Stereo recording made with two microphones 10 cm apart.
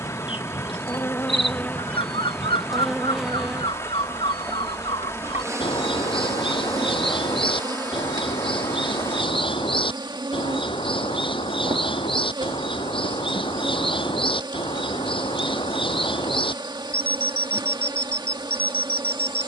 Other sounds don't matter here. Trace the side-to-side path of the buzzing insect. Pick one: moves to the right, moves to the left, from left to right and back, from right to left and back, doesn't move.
moves to the right.